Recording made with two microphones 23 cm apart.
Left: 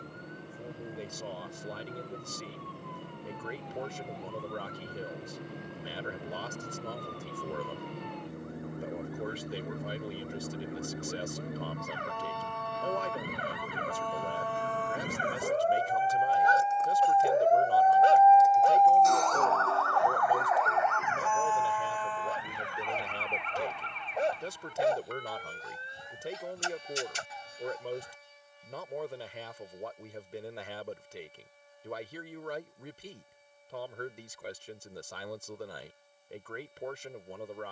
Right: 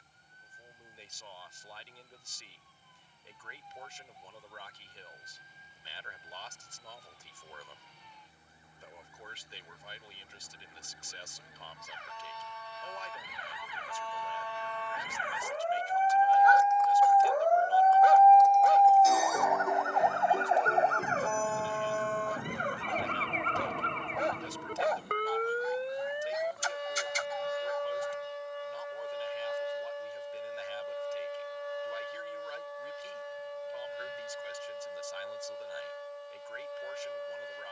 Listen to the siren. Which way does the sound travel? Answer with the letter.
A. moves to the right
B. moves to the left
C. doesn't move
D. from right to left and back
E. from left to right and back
A.